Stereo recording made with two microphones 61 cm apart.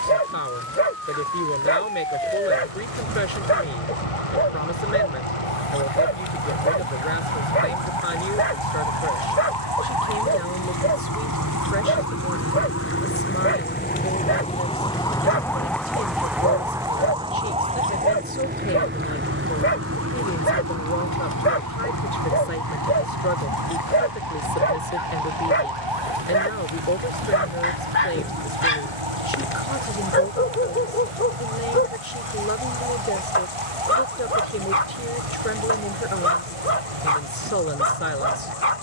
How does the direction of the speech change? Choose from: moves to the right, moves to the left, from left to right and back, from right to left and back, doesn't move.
doesn't move.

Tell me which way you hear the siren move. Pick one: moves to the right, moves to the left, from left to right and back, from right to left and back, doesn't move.
moves to the right.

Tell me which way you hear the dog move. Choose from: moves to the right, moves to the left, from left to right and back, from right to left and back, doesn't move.
doesn't move.